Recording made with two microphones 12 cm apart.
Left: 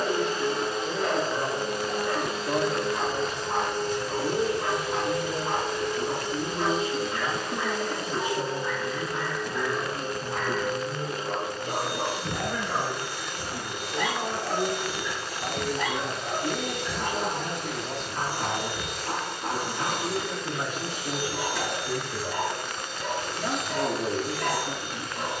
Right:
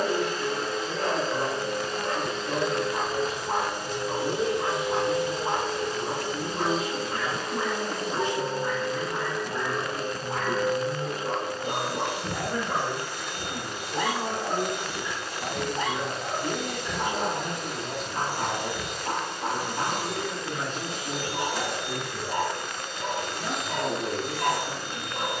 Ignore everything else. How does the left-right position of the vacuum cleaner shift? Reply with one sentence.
You can hear the vacuum cleaner move to the right.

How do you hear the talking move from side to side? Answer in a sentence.
In this clip you hear the talking move from left to right and back again.